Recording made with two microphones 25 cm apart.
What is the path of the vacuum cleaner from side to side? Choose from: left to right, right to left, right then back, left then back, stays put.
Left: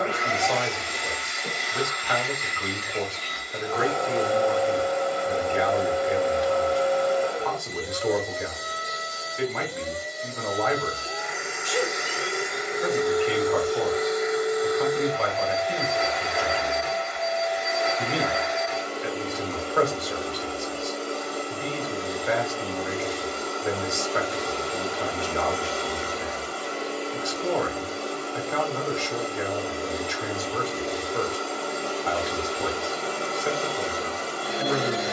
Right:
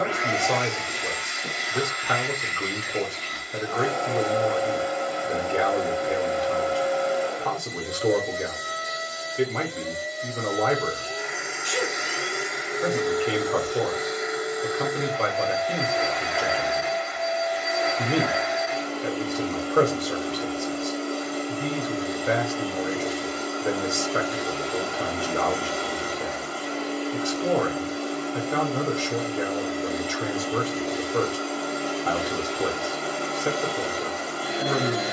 stays put.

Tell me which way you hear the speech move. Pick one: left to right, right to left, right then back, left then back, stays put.
stays put.